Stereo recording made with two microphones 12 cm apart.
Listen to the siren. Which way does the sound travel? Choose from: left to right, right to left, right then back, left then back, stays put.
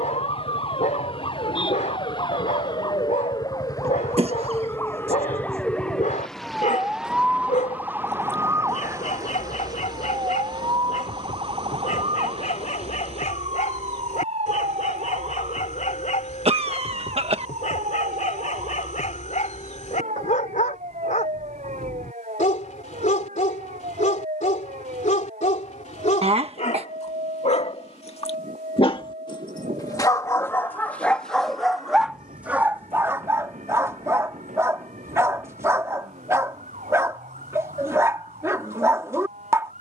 left to right.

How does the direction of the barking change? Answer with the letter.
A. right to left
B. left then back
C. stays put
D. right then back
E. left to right
E.